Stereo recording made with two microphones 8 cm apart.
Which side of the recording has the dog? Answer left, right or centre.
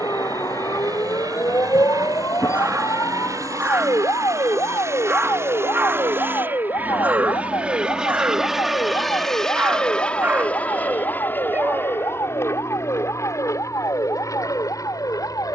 right.